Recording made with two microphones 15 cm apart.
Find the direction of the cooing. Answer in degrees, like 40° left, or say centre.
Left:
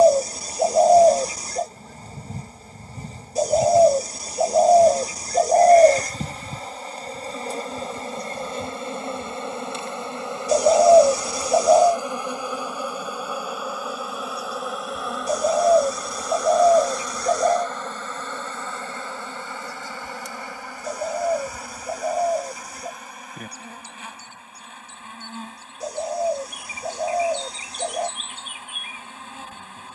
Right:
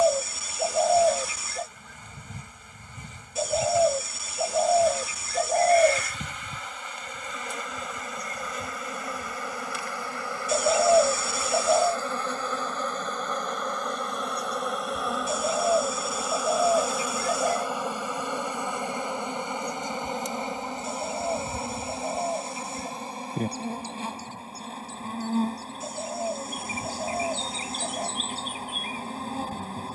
40° left.